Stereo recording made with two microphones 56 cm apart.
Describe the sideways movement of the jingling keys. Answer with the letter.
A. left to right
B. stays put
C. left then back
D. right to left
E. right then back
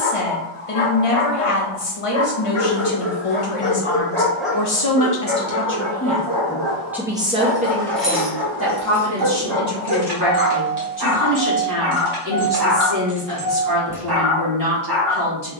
E.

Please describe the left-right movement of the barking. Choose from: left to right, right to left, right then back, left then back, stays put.
left to right.